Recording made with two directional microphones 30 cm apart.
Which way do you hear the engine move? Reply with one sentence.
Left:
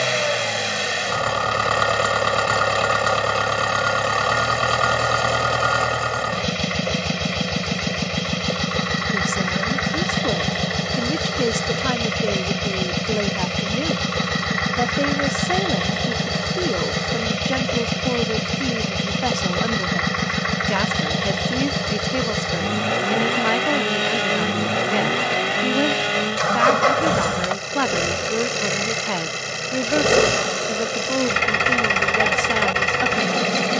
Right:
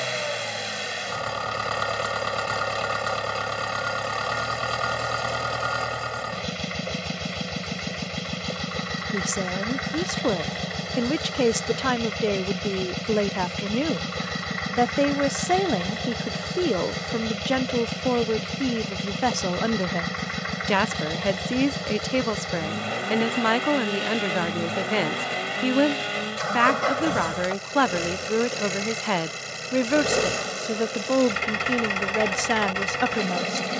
In this clip you hear the engine stay in one place.